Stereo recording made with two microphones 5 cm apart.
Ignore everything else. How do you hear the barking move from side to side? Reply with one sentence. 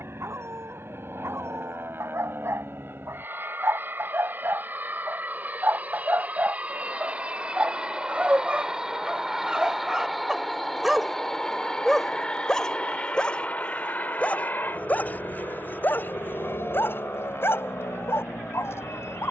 You can hear the barking travel towards the left.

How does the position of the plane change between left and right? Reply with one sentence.
You can hear the plane move from right to left.